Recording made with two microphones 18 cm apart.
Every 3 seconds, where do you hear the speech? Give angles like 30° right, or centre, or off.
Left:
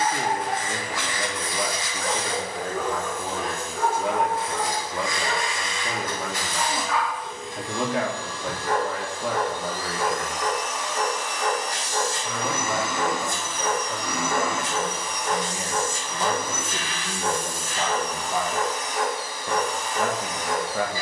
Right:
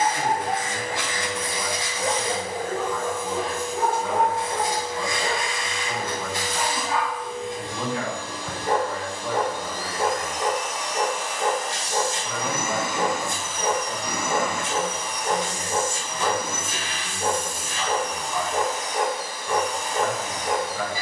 70° left, 70° left, 70° left, 60° left, 10° right, 30° left, 60° left.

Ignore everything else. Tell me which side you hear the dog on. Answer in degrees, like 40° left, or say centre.
30° right.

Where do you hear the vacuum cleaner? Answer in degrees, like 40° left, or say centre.
30° right.